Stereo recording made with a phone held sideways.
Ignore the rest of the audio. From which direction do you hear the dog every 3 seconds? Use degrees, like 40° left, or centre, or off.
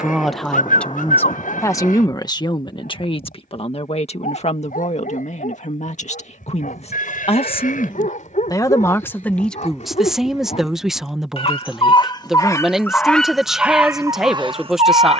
70° left, 70° left, 60° left, 50° left, 10° right.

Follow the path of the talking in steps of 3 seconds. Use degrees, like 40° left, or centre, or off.
20° left, 50° left, 40° left, centre, centre.